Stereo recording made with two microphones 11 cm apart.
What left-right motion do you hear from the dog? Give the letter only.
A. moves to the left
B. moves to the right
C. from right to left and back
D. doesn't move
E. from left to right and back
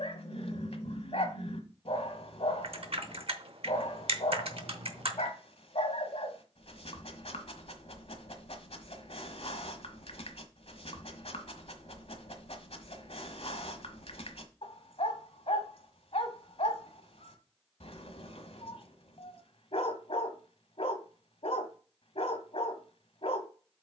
D.